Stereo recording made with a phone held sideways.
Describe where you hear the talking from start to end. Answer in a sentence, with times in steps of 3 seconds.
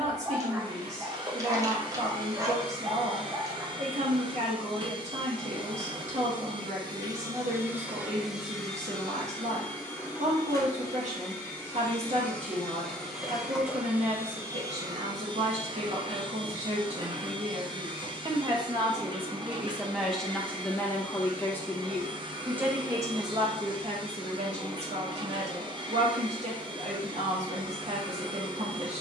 In this clip you hear the talking on the right from 0 s, in the centre from 18 s and on the right from 24 s.